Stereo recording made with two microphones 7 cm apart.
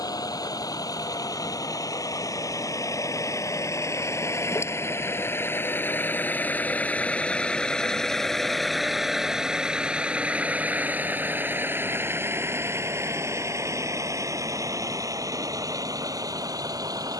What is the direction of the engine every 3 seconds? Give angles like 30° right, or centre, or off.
60° left, 40° left, 10° left, 20° right, 40° right, 50° right.